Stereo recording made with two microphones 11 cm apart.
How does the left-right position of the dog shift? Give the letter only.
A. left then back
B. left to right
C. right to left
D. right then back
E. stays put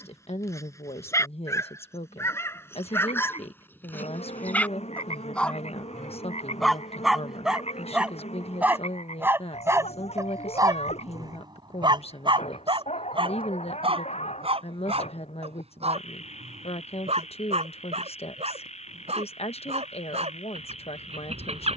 B.